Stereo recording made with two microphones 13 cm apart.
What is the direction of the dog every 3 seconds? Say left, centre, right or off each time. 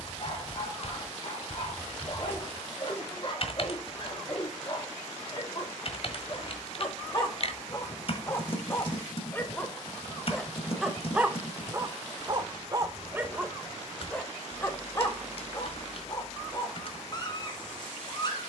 left, left, left, centre, centre, left.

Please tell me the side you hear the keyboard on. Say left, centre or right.
left.